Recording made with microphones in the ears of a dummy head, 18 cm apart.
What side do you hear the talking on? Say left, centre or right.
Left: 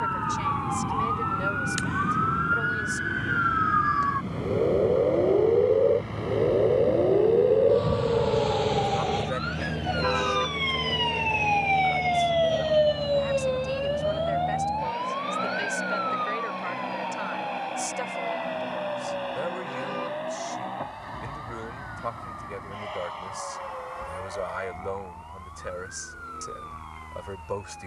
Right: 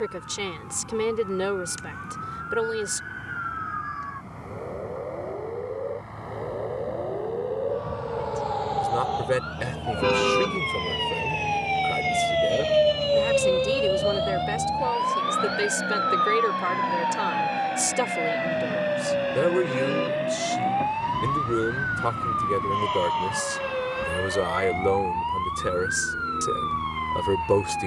right.